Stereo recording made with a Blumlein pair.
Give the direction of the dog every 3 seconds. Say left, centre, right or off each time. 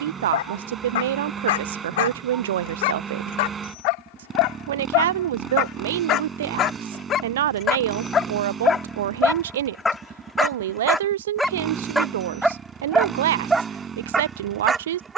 left, left, left, centre, centre.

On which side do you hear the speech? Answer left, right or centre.
right.